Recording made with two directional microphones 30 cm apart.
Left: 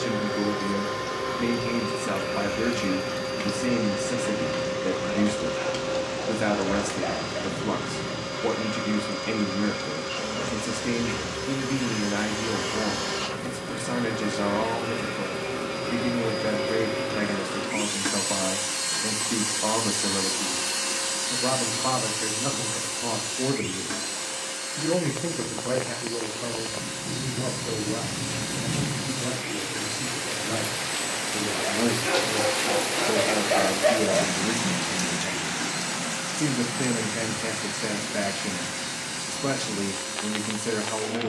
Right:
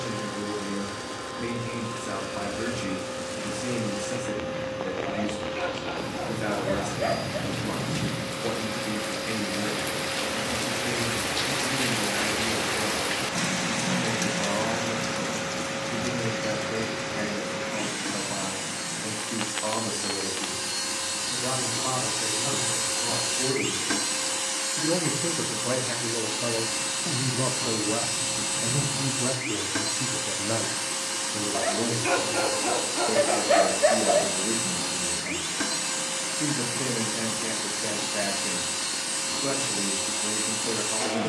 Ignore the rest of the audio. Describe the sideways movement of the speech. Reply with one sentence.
In this clip you hear the speech go right and come back.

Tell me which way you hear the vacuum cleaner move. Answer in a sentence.
You can hear the vacuum cleaner travel towards the right.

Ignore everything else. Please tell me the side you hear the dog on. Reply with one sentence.
In this clip you hear the dog on the right.